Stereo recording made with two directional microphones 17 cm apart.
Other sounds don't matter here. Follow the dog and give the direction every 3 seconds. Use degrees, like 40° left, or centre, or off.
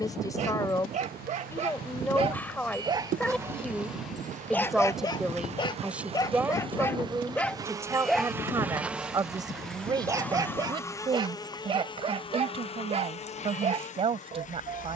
40° right, 10° left, 10° left, 20° right, 40° right.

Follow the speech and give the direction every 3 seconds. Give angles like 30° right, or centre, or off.
10° left, centre, 10° right, 20° right, 30° right.